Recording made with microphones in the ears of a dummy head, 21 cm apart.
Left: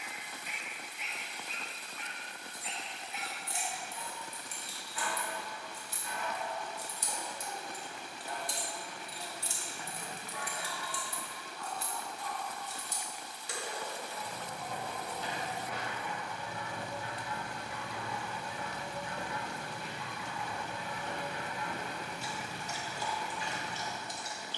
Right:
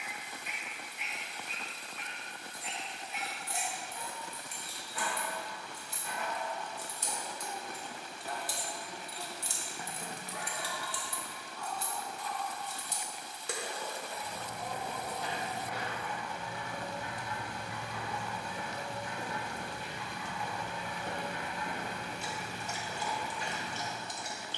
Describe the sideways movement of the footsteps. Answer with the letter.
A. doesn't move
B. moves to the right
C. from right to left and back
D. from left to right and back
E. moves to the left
B.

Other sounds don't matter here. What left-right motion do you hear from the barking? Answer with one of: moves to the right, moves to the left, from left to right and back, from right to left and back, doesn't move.
doesn't move.